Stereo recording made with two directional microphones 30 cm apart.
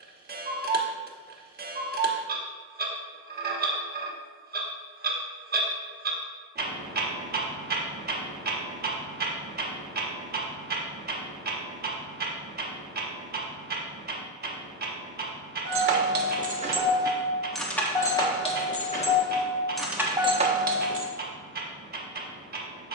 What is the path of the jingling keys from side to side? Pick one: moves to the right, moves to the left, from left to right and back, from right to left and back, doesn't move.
from right to left and back.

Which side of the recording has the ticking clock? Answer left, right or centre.
right.